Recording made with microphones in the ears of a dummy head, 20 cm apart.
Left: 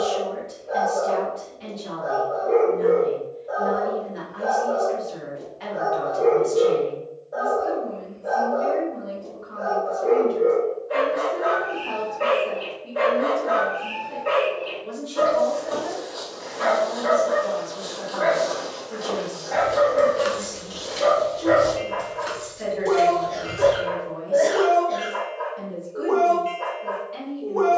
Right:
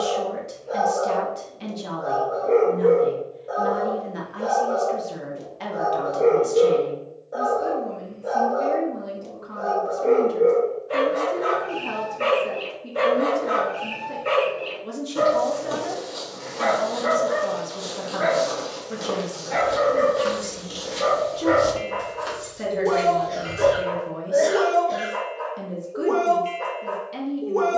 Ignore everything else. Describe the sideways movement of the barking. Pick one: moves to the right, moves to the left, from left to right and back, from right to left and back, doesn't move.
doesn't move.